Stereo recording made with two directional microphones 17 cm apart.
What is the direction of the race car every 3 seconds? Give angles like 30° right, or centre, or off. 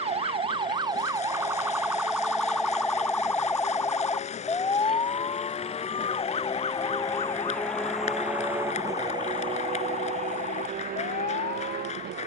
60° left, 50° left, 10° left, 50° right.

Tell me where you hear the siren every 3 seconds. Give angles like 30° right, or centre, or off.
10° right, 20° left, 40° left, 50° left.